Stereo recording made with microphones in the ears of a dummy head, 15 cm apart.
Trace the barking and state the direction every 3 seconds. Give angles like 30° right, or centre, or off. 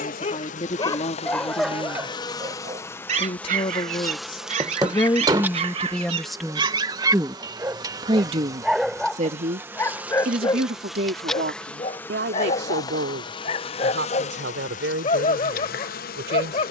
10° left, 50° right, 20° right, 20° left, 40° left, 40° left.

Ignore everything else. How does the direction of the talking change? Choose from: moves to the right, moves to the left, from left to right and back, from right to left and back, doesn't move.
moves to the right.